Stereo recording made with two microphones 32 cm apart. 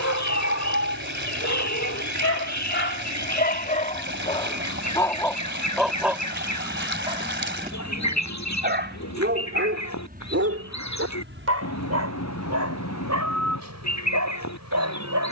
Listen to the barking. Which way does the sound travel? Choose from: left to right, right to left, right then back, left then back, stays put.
left to right.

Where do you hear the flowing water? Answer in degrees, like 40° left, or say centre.
40° right.